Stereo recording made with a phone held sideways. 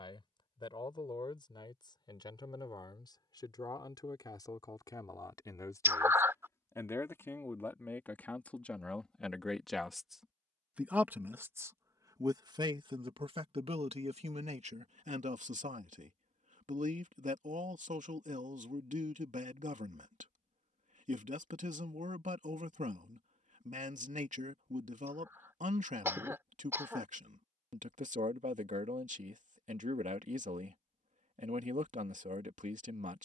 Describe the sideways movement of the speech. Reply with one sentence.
You can hear the speech move to the right.